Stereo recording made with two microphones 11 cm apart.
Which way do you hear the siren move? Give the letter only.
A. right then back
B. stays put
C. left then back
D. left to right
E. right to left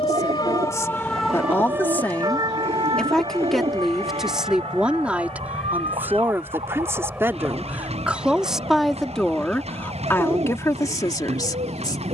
D.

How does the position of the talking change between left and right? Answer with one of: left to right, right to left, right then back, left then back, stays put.
right then back.